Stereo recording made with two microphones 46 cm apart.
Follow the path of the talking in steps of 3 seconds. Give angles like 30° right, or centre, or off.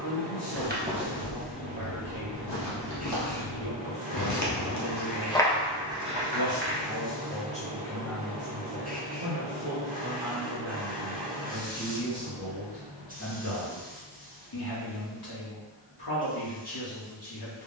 50° left, 50° left, 10° left, 10° right, 30° left, 50° left.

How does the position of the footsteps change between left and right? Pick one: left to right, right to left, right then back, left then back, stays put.
left then back.